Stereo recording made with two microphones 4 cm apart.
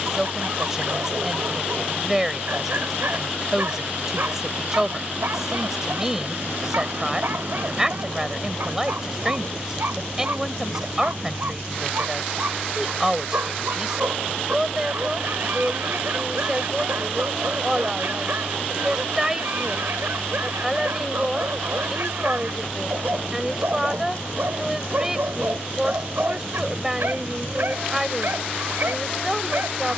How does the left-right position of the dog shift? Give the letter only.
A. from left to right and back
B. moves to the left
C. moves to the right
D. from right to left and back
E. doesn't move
E.